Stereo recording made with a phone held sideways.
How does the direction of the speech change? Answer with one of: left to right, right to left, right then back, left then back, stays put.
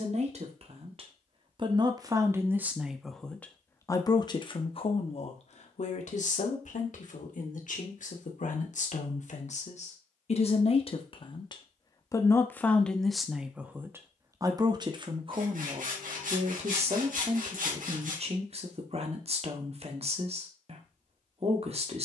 left then back.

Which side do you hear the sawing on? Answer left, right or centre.
right.